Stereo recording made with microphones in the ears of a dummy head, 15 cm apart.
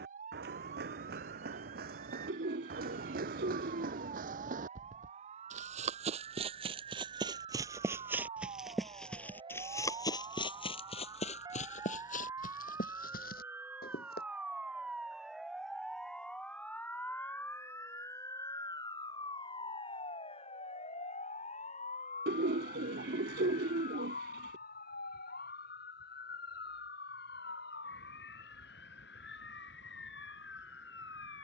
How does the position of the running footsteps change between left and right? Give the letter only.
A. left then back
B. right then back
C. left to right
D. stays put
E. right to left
E.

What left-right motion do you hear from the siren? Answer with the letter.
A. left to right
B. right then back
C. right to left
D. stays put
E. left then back
C.